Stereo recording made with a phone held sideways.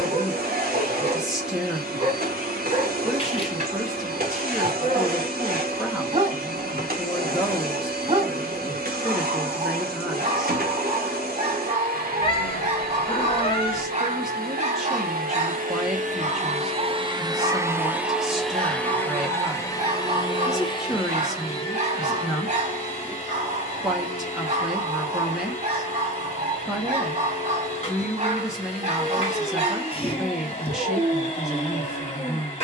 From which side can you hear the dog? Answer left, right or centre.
right.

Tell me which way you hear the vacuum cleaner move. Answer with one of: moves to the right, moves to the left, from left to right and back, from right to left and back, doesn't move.
moves to the left.